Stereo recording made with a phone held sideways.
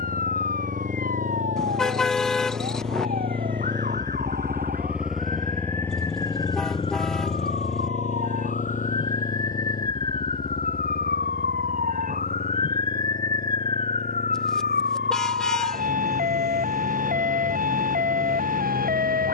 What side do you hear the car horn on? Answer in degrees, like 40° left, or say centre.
centre.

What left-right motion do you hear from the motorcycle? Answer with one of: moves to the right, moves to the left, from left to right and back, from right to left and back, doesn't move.
moves to the left.